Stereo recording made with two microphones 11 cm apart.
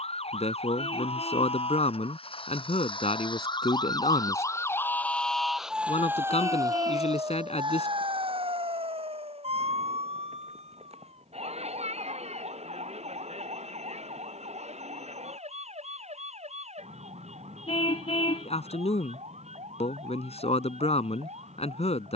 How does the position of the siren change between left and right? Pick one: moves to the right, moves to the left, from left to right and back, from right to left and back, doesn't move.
moves to the right.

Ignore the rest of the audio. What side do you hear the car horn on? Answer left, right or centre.
left.